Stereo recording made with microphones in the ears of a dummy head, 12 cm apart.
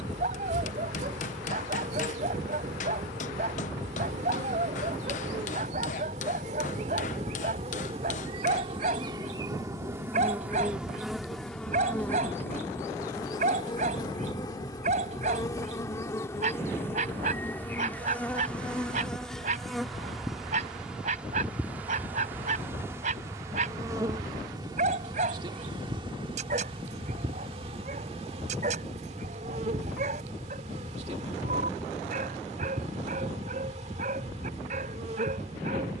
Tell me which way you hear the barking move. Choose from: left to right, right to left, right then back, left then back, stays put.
stays put.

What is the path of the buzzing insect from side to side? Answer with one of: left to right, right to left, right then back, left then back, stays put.
left then back.